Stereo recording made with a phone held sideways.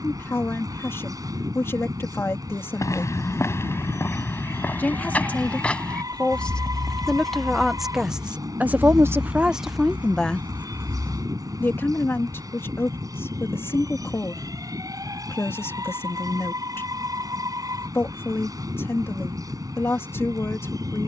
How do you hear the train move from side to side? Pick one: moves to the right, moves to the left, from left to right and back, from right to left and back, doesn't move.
doesn't move.